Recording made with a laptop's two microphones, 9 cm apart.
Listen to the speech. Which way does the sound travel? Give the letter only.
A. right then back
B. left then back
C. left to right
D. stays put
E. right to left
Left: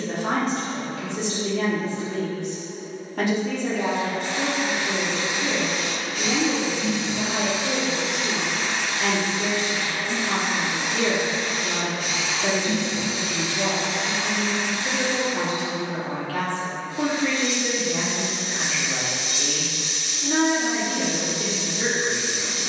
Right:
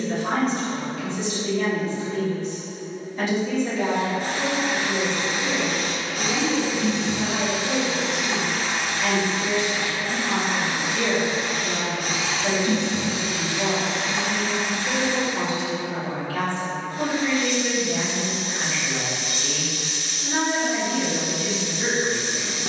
D.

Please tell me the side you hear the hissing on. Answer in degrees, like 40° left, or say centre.
50° right.